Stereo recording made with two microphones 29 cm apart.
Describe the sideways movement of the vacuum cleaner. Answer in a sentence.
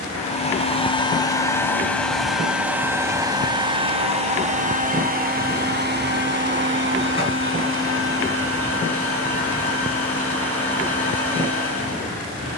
In this clip you hear the vacuum cleaner go from the left side to the right.